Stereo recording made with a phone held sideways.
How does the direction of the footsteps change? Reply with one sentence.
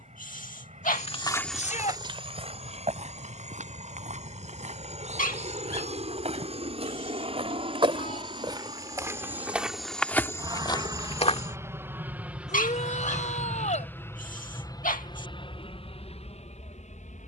You can hear the footsteps go right and come back.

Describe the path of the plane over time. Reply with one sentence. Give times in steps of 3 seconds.
You can hear the plane on the right from 0 s, in the centre from 12 s and on the left from 15 s.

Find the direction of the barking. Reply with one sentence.
You can hear the barking on the left.